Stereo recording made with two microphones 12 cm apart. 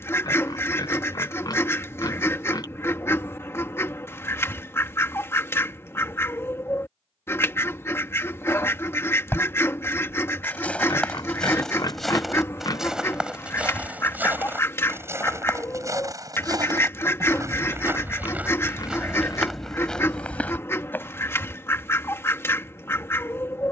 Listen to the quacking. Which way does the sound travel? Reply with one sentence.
In this clip you hear the quacking stay put.